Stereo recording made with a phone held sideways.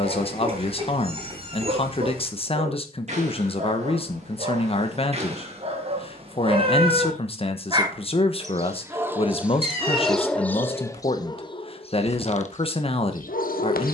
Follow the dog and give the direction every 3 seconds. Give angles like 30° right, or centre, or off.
50° right, 40° right, 30° right, 10° left, 60° left.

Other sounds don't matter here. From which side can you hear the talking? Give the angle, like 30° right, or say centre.
40° left.